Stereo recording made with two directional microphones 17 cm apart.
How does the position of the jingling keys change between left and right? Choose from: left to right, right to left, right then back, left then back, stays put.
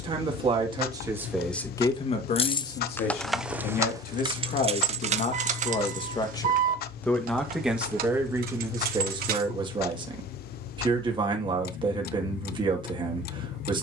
left to right.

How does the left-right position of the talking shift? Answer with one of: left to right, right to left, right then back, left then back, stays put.
left then back.